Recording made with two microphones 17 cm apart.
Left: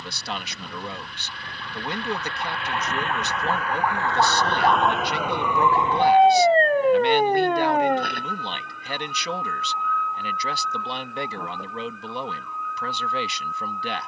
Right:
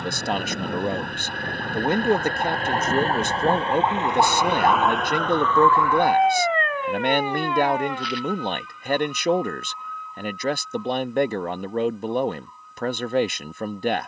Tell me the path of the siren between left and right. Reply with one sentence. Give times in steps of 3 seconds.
In this clip you hear the siren on the right from 0 s, in the centre from 3 s and on the left from 6 s.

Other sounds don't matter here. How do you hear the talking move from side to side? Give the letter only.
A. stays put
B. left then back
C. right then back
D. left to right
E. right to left
A.